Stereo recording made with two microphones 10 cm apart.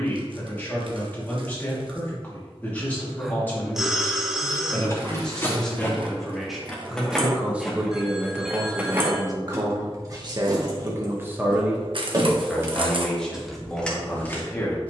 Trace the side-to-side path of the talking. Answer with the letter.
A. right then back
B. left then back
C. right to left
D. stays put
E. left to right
A.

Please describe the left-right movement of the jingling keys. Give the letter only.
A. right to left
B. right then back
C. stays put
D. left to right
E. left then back
B.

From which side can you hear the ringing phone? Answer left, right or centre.
centre.